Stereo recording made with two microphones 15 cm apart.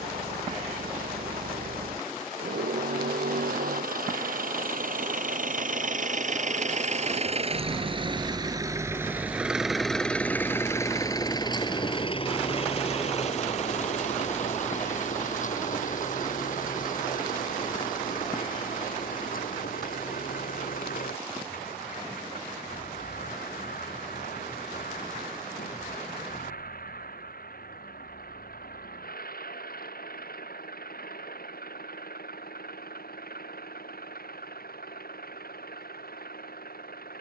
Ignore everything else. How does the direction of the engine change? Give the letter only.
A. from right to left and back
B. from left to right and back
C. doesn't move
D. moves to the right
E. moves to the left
E.